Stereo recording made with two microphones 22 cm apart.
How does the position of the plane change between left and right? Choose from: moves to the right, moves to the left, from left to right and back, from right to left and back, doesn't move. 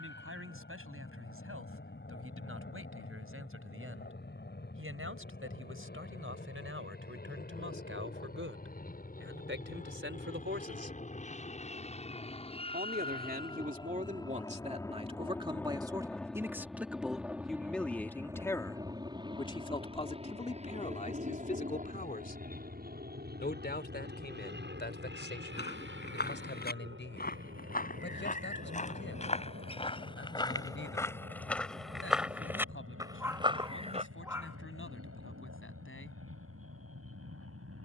moves to the right.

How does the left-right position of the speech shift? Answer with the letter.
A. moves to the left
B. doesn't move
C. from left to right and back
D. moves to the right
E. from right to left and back
A.